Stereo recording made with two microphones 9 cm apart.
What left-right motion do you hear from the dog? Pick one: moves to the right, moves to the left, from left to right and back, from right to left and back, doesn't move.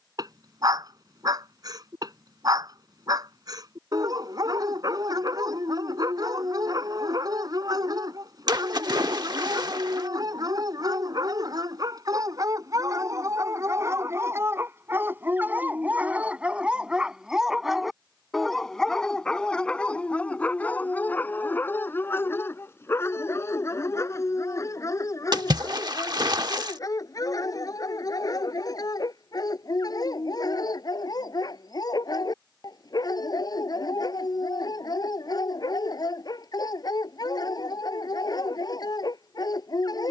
moves to the left.